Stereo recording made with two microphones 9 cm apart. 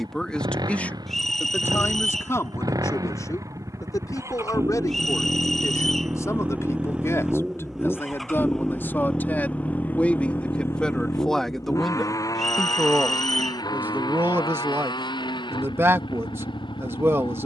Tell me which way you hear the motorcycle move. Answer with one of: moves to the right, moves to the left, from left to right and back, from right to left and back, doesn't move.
moves to the left.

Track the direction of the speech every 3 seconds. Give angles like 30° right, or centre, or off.
20° left, 40° left, 30° left, 10° left, 20° right, 30° right.